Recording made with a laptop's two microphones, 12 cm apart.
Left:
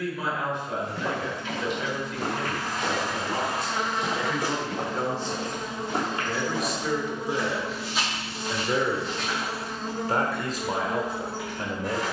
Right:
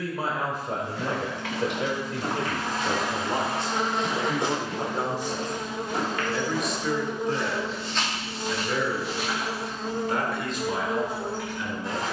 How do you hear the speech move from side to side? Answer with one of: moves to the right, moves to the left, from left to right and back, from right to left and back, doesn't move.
moves to the left.